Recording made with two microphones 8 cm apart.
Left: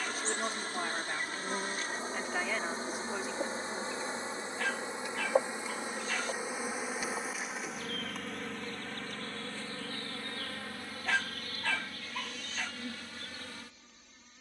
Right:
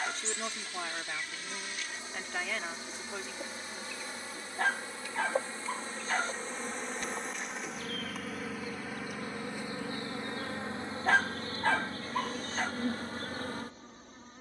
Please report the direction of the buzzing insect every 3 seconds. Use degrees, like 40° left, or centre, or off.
40° left, 30° left, centre, 20° right, 40° right.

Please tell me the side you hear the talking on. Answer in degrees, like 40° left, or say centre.
10° left.